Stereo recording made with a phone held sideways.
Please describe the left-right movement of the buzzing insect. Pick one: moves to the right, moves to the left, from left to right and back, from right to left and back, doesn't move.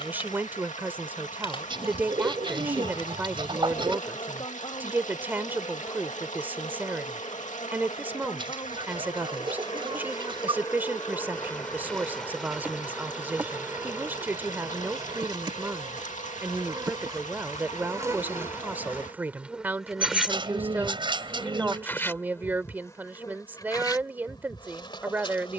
from left to right and back.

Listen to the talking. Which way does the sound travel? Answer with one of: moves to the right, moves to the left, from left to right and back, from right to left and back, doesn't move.
doesn't move.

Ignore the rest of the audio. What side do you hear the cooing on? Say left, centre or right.
right.